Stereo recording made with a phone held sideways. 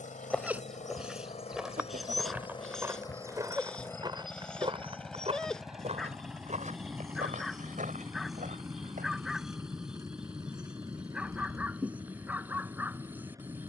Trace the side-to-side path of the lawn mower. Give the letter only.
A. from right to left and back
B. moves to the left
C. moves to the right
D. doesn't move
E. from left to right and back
C.